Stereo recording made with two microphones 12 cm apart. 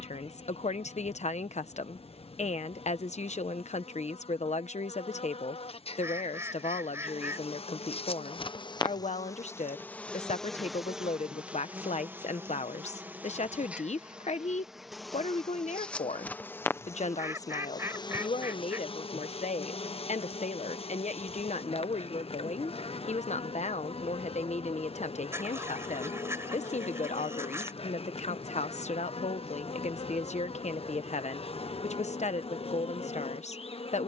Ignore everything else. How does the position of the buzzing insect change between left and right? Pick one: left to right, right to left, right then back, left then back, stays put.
right then back.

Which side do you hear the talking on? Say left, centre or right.
left.